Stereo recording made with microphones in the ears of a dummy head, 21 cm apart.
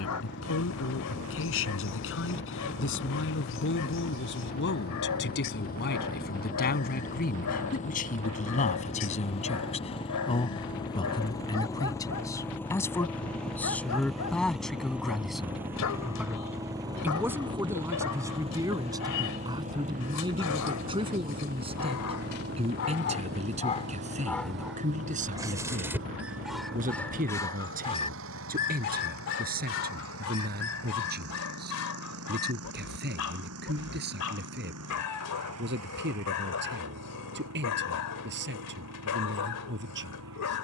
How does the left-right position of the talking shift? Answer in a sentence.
In this clip you hear the talking travel towards the right.